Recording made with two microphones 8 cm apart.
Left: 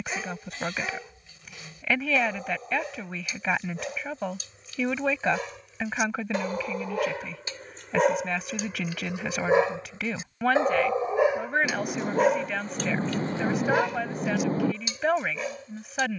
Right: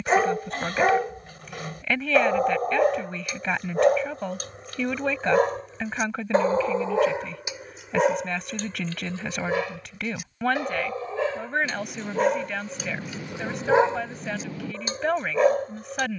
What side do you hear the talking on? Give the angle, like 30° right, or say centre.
centre.